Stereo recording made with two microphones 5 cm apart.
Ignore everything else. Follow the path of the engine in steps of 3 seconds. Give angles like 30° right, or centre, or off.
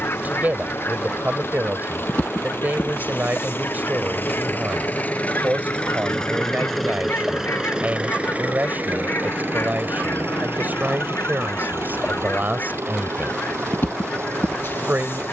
60° left, 40° left, 10° right, 60° right, 80° right.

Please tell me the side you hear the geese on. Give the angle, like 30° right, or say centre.
60° left.